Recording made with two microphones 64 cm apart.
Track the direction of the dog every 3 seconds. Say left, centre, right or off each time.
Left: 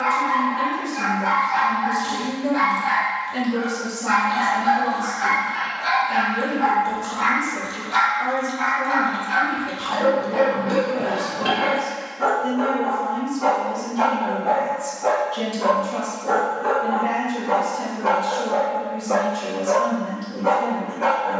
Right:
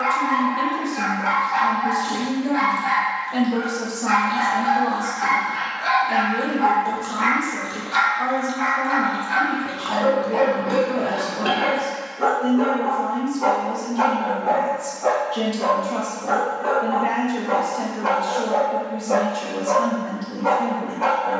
right, centre, left, left, centre, centre, right.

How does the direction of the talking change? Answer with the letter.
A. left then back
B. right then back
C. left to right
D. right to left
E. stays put
E.